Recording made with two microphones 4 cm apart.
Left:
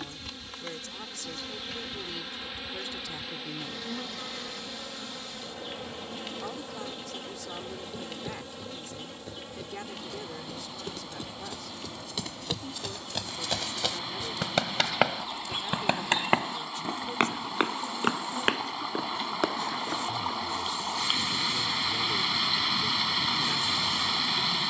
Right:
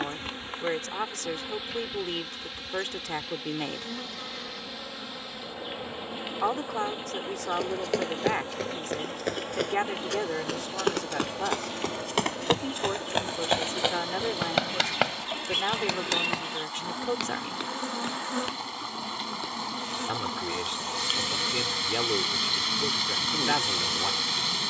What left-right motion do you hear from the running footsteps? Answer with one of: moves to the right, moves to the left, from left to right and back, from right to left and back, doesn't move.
moves to the left.